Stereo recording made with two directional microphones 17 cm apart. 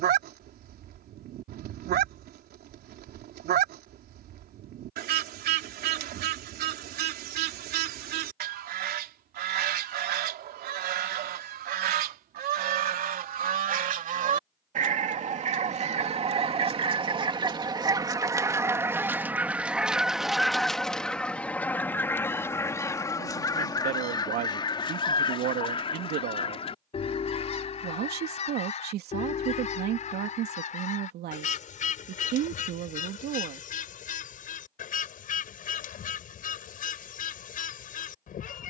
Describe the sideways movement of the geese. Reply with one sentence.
You can hear the geese travel towards the left.